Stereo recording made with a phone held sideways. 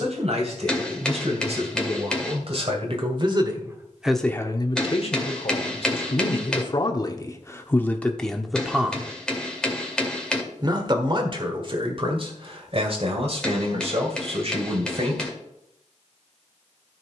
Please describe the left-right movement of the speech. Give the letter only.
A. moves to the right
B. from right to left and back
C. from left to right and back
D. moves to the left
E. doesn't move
B.